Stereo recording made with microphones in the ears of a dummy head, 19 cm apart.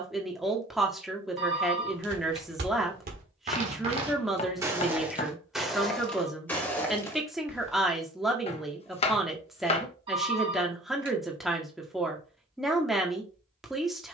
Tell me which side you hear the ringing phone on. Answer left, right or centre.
right.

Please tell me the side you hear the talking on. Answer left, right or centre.
centre.